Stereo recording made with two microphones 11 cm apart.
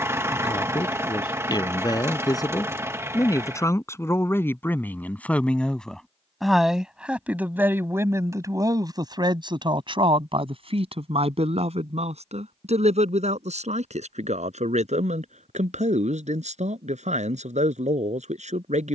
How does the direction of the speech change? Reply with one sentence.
In this clip you hear the speech go from the left side to the right.